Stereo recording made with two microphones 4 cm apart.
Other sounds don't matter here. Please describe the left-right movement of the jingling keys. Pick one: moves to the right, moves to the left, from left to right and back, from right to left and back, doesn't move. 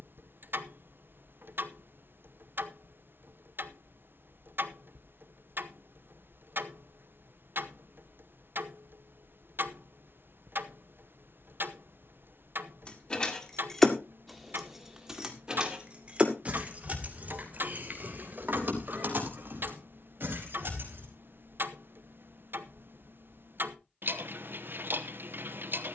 moves to the right.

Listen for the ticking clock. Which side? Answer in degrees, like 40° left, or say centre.
60° right.